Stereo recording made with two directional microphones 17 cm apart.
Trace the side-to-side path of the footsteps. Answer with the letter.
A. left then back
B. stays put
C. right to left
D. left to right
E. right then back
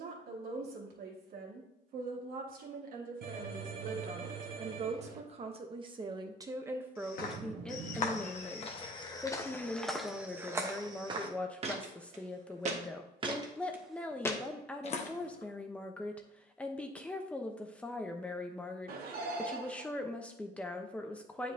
E.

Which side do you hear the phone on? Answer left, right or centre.
right.